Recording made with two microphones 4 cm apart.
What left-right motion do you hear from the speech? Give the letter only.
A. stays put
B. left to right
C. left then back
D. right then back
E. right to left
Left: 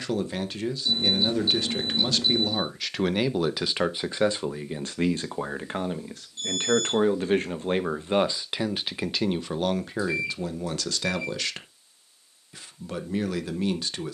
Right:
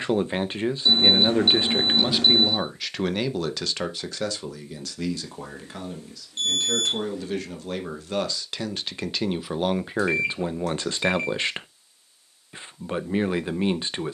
C.